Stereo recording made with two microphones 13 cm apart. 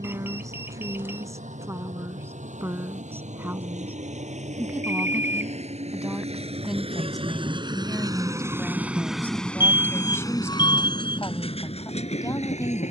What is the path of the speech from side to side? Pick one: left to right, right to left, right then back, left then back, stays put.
right to left.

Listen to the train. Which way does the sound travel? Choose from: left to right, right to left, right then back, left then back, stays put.
right to left.